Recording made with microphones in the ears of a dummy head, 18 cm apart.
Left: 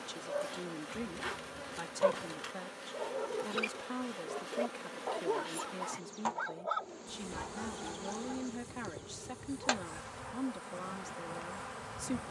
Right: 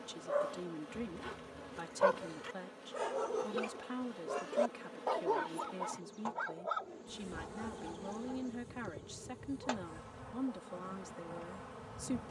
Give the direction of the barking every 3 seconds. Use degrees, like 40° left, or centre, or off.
70° right, 30° right, 30° left, 50° left.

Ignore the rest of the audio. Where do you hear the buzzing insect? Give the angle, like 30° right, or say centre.
50° left.